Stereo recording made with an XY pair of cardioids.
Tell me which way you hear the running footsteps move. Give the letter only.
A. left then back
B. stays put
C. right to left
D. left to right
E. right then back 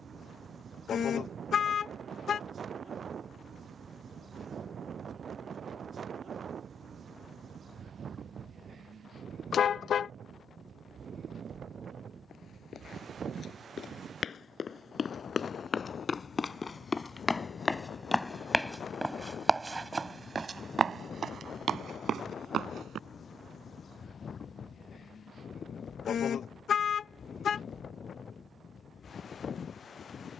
D.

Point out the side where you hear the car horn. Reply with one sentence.
In this clip you hear the car horn on the left.